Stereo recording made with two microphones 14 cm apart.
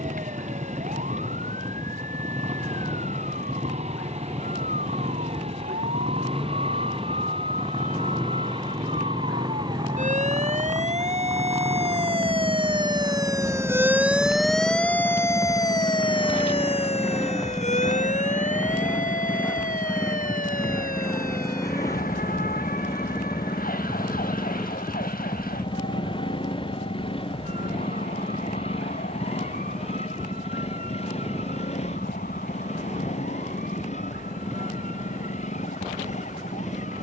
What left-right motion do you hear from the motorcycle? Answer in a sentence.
In this clip you hear the motorcycle go from the right side to the left.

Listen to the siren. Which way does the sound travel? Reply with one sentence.
You can hear the siren go from the right side to the left.